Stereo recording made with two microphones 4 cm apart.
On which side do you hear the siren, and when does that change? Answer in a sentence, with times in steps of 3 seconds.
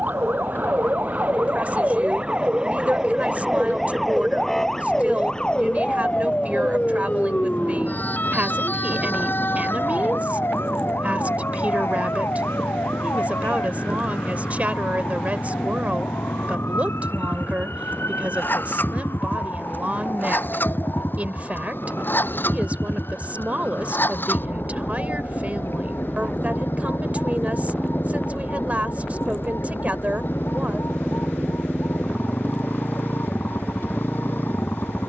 In this clip you hear the siren on the right from 0 s, in the centre from 3 s, on the left from 6 s and not at all from 33 s.